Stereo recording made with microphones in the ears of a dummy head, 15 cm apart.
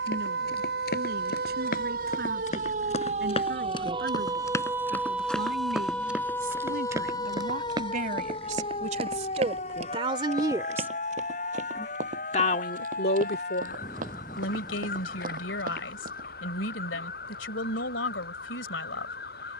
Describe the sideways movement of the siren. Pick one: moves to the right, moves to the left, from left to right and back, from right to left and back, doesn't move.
moves to the left.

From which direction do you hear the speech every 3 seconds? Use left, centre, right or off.
right, right, right, right, left, left, left.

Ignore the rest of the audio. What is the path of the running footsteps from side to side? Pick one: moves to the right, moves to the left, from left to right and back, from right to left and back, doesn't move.
moves to the right.